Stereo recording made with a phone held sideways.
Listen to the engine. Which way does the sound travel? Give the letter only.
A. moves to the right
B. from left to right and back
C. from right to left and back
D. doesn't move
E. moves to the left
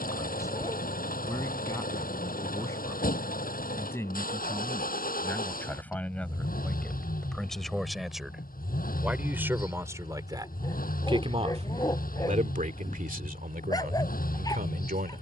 D.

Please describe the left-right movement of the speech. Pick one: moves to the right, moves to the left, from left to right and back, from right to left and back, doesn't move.
moves to the right.